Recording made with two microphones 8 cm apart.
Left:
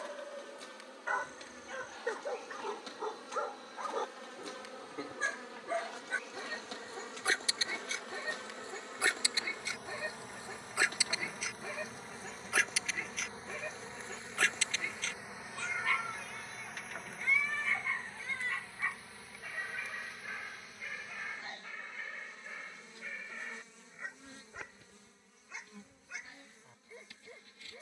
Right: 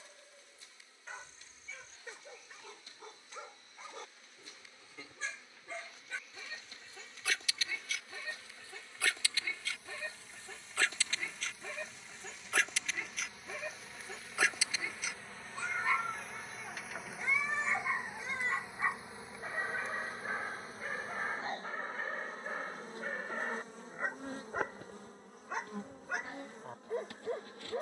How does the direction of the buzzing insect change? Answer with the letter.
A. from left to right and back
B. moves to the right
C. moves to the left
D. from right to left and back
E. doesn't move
B.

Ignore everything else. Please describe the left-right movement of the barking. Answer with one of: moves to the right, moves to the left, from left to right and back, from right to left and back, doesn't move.
moves to the right.